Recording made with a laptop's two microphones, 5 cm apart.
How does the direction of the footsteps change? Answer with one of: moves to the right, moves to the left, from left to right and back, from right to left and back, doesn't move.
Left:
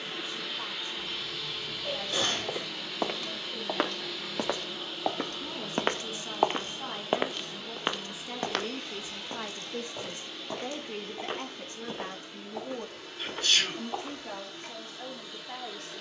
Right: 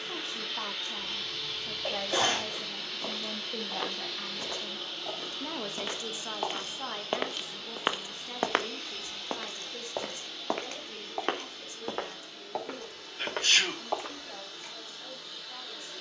moves to the right.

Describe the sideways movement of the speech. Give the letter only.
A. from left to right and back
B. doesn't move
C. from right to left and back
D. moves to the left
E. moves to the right
D.